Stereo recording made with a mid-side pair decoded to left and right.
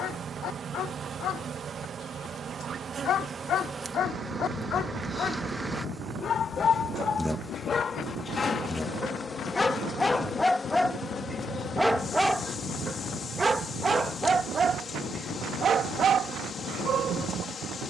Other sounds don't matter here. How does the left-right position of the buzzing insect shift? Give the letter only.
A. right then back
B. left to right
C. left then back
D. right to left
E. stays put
D.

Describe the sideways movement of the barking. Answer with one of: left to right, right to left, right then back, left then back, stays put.
left to right.